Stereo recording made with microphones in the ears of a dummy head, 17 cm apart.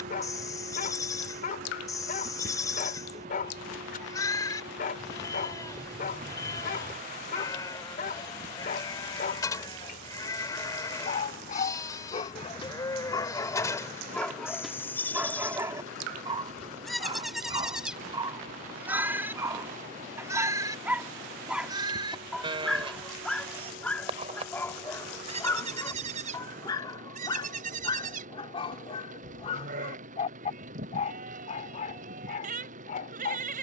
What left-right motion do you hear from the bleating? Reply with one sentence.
You can hear the bleating move from left to right.